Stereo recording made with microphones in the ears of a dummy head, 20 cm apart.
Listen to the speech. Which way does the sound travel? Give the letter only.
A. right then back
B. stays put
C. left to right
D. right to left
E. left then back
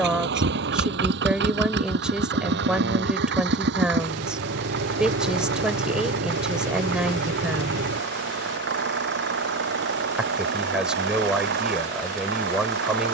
B.